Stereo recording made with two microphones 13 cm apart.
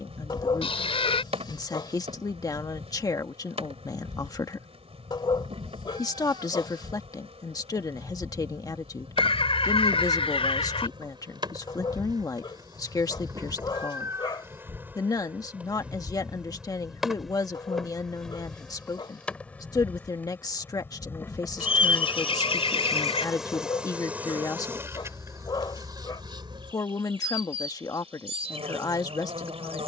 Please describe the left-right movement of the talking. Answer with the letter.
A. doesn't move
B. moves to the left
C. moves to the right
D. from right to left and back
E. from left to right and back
A.